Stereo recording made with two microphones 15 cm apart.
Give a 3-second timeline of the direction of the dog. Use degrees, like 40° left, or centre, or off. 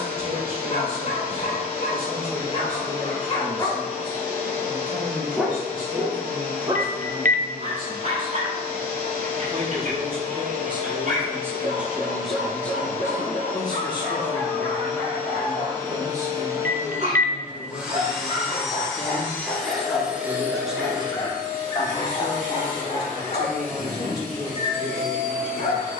40° left, 20° left, 40° right, 60° right, 70° right, 50° right, 20° right, 30° left, 40° left.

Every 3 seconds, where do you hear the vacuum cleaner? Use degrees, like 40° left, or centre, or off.
80° right, 80° right, 80° right, 80° right, 60° right, 20° right, centre, 60° right, 70° right.